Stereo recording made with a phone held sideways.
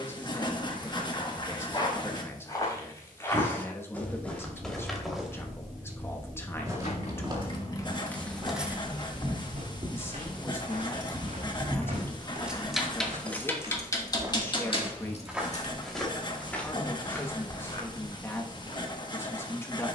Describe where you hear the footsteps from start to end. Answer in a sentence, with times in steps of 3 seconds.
In this clip you hear the footsteps on the left from 0 s, in the centre from 3 s, on the right from 6 s, in the centre from 15 s and on the left from 18 s.